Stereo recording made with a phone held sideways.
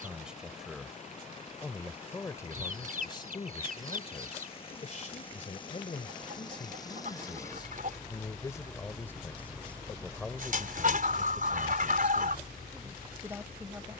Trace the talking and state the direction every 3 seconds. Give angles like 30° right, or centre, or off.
10° left, 40° left, 30° left, centre, 10° right.